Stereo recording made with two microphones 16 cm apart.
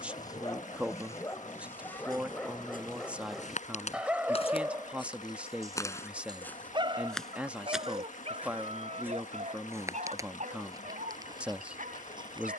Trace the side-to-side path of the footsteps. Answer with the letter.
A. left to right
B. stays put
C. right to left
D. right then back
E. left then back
A.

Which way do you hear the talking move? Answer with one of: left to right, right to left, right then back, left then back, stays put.
stays put.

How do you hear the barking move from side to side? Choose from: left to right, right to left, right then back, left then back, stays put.
left to right.